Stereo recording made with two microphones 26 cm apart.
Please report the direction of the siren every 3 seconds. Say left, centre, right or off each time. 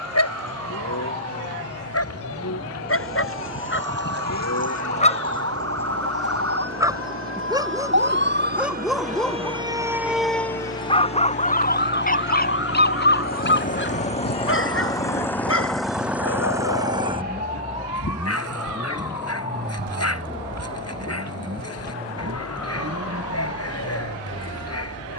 right, right, right, centre, left, left, left, left, left.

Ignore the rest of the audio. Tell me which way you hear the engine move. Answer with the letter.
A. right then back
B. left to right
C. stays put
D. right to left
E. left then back
B.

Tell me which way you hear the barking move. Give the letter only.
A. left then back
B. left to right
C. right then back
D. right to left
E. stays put
C.